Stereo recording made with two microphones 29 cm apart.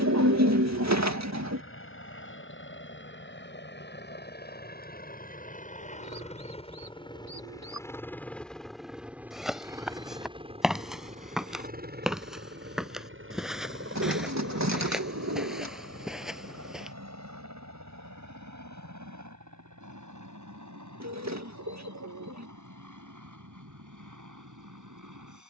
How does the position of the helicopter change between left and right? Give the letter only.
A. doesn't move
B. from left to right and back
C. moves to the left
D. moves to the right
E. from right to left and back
D.